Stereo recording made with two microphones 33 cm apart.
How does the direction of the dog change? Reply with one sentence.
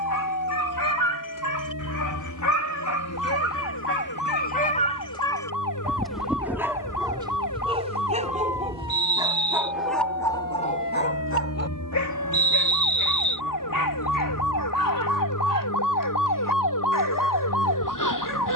You can hear the dog move from left to right and back again.